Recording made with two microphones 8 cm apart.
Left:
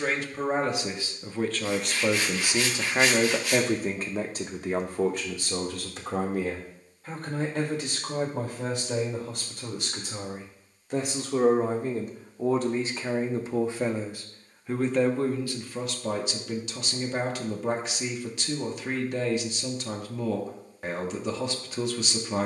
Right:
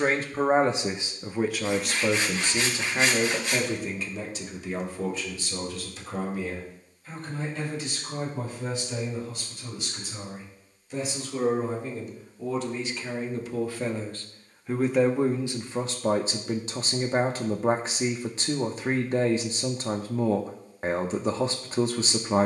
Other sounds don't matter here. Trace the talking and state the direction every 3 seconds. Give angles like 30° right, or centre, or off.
10° right, 50° left, 70° left, 60° left, 30° left, 30° right, 30° right, 30° right.